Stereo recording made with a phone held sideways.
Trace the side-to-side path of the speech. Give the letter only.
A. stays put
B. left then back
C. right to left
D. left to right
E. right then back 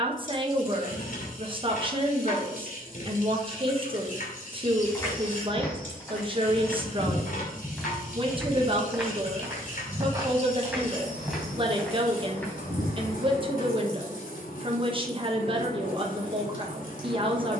A.